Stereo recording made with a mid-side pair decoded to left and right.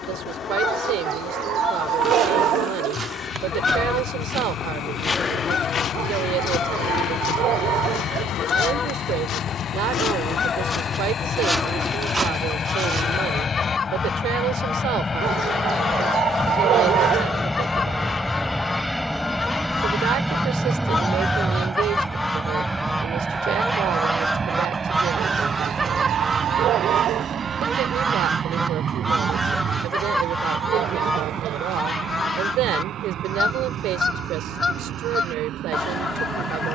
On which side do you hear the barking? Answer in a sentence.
You can hear the barking on the right.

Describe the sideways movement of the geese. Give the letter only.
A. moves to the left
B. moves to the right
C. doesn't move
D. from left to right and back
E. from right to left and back
D.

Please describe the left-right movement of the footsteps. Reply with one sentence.
In this clip you hear the footsteps go left and come back.